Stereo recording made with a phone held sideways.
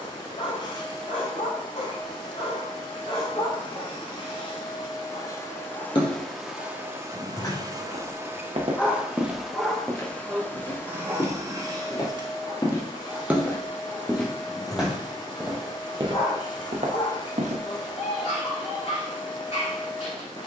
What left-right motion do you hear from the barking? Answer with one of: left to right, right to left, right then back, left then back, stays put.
right then back.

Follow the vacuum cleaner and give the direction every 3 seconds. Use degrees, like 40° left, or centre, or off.
40° left, 30° left, 20° right, 10° left, 30° left, 30° left, 30° left.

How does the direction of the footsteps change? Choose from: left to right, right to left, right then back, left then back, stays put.
left then back.